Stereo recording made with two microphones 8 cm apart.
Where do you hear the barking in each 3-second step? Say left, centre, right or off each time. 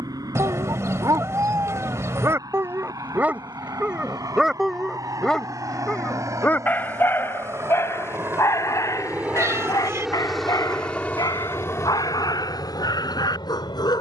right, centre, left, left, left.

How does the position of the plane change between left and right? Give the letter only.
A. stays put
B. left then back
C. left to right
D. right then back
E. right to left
E.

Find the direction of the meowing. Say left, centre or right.
right.